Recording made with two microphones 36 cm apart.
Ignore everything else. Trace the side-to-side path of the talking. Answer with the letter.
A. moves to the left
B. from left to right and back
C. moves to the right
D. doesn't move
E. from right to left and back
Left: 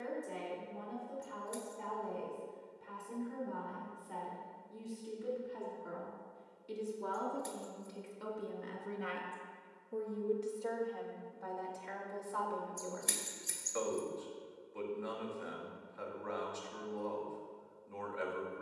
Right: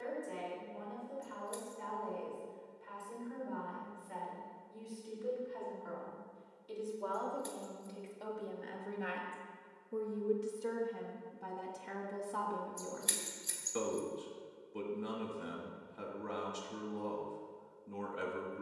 C.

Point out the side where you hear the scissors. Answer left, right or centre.
left.